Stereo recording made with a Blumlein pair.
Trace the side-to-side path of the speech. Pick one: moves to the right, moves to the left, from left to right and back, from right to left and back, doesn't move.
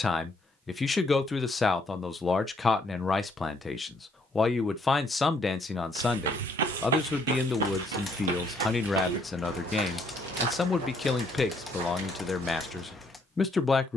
doesn't move.